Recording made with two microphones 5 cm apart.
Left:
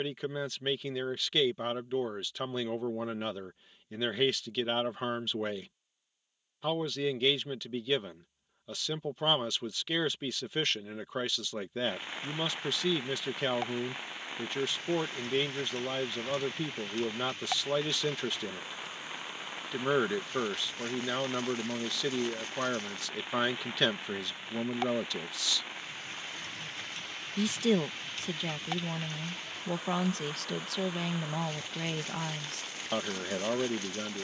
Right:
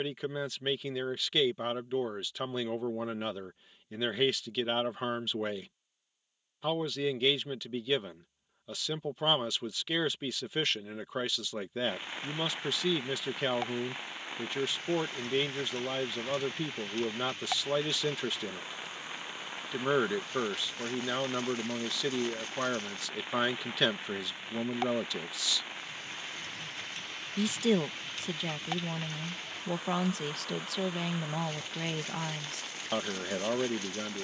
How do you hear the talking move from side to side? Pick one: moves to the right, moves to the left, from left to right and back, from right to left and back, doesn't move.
doesn't move.